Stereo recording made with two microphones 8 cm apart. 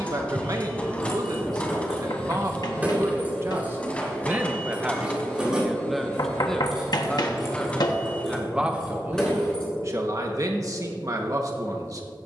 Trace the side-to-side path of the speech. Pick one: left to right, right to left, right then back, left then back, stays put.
left then back.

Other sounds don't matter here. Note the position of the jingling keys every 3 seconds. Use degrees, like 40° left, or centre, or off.
centre, 20° right, centre, 10° left.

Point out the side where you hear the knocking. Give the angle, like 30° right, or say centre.
60° left.